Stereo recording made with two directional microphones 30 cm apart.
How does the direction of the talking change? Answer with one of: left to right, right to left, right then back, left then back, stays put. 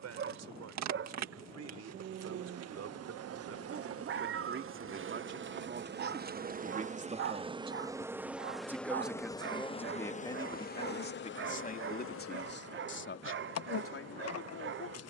right to left.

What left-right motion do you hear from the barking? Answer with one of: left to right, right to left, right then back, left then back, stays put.
stays put.